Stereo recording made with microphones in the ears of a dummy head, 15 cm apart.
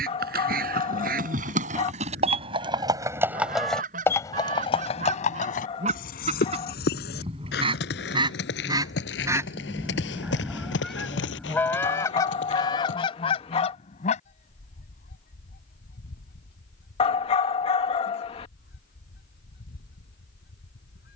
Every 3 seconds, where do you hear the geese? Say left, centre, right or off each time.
right, right, right, centre, left, left, left.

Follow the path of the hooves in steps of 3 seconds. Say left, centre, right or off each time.
right, left, left, left, left, off, off.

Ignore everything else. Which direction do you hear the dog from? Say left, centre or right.
left.